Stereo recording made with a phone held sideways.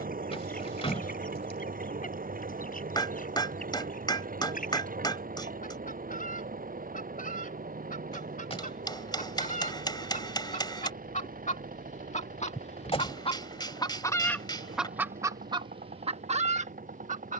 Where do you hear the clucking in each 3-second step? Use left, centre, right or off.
left, left, left, left, left, right.